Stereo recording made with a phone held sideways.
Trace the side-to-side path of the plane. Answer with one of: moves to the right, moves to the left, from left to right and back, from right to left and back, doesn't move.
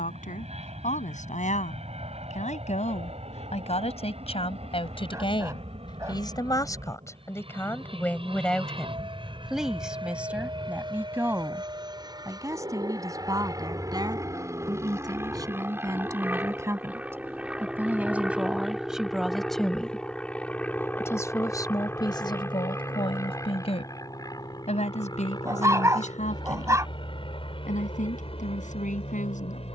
moves to the left.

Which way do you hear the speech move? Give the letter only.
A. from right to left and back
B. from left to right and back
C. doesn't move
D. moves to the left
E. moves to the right
B.